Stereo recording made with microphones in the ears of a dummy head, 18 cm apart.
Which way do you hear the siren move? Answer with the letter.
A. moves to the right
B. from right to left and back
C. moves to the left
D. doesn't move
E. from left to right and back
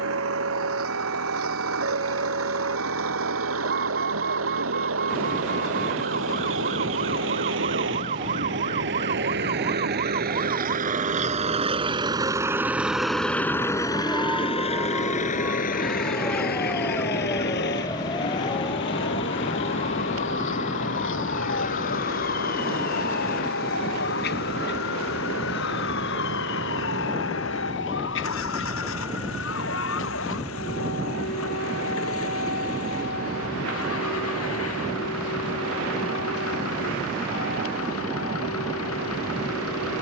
C.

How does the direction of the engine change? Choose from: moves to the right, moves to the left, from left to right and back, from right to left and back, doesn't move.
moves to the left.